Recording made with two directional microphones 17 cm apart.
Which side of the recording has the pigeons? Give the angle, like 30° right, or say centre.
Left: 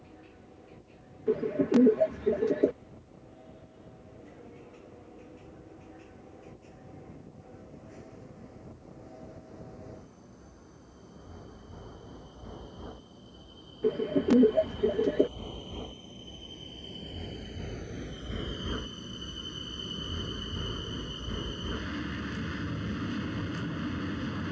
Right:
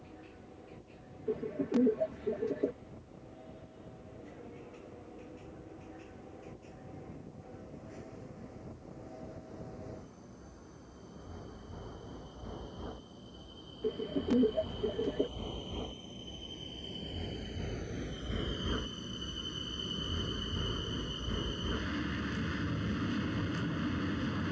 40° left.